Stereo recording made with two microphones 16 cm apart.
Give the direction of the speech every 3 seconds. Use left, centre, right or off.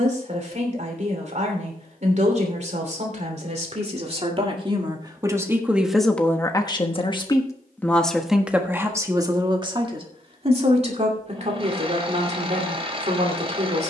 right, right, centre, right, right.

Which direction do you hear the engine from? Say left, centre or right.
right.